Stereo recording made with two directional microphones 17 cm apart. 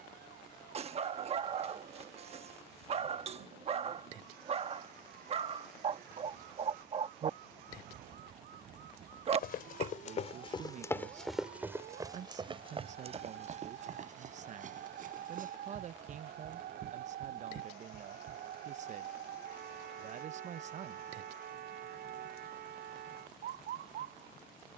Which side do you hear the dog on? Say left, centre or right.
right.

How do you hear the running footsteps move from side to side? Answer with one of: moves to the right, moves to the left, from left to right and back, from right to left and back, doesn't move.
moves to the right.